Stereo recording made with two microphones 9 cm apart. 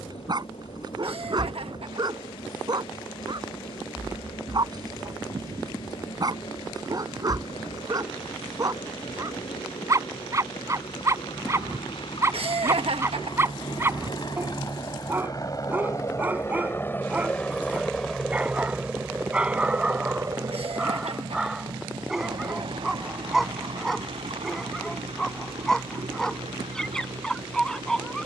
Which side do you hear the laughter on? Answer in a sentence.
In this clip you hear the laughter on the right.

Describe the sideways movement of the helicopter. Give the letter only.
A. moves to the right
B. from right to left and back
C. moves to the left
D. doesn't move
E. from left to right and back
A.